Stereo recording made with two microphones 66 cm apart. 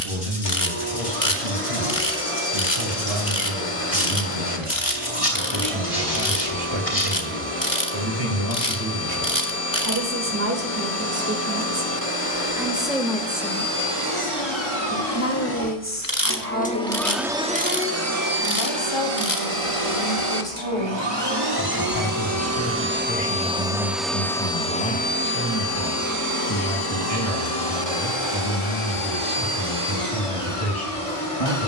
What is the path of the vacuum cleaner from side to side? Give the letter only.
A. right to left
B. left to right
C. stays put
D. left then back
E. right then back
E.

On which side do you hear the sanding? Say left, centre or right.
left.